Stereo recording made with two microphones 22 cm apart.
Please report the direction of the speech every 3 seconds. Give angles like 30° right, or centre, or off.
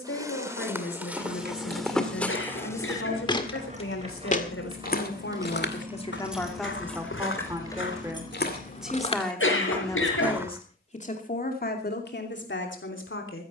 80° left, 70° left, 10° right, 20° left, 60° left.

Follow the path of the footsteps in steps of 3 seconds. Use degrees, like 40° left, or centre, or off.
centre, 40° left, 60° left, centre, off.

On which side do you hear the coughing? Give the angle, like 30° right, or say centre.
70° left.